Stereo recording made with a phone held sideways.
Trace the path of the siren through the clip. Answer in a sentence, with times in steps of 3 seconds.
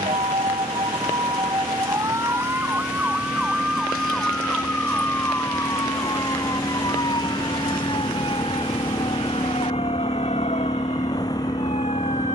You can hear the siren on the right from 0 s, in the centre from 3 s and on the left from 6 s.